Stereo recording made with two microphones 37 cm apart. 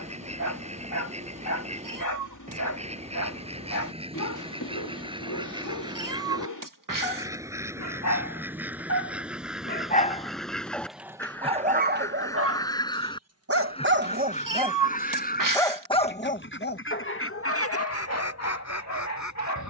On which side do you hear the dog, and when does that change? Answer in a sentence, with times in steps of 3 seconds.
In this clip you hear the dog on the left from 0 s, in the centre from 9 s, on the right from 12 s and on the left from 15 s.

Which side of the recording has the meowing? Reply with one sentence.
You can hear the meowing on the right.